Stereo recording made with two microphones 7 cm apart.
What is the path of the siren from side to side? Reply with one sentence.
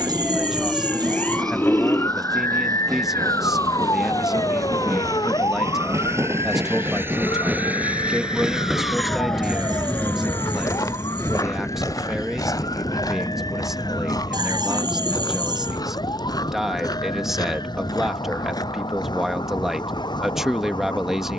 In this clip you hear the siren move from right to left.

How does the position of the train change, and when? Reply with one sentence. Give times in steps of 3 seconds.
In this clip you hear the train on the right from 0 s and on the left from 9 s.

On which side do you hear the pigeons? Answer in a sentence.
In this clip you hear the pigeons on the right.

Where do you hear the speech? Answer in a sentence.
You can hear the speech in the centre.